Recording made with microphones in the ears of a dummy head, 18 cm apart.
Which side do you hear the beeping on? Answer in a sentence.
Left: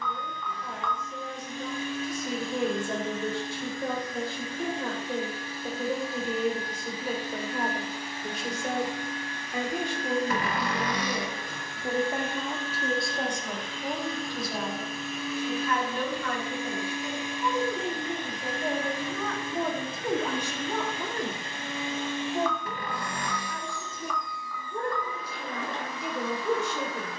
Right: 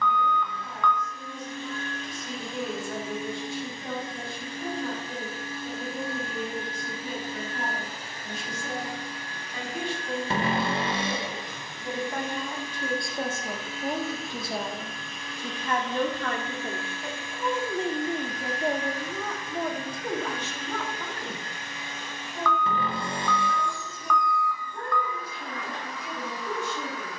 You can hear the beeping on the right.